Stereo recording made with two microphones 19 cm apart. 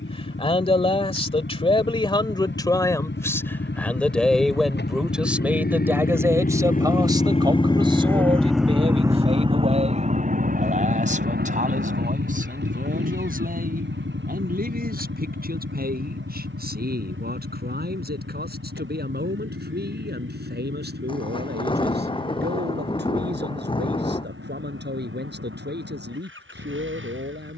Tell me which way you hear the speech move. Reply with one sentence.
In this clip you hear the speech move to the right.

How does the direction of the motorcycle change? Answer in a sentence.
You can hear the motorcycle travel towards the right.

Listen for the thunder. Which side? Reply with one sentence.
In this clip you hear the thunder on the left.